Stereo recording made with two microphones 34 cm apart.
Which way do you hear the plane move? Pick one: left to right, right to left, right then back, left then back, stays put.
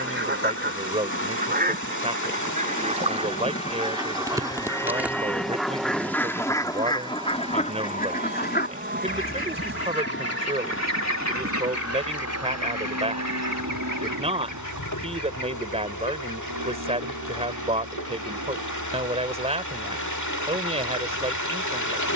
left to right.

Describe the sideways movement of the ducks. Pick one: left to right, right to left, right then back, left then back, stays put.
right to left.